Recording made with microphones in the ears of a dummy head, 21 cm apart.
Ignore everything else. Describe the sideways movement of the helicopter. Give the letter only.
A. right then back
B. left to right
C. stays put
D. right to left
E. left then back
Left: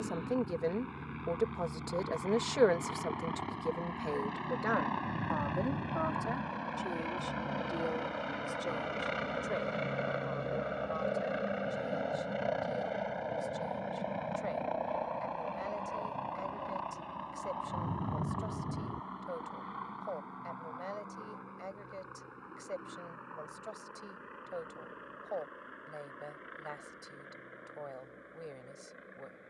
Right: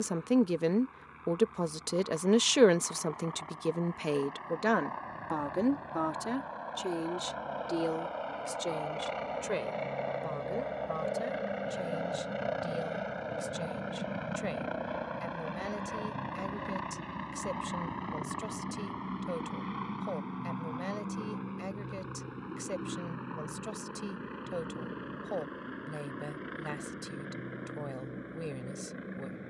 B.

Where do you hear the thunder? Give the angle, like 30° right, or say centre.
50° left.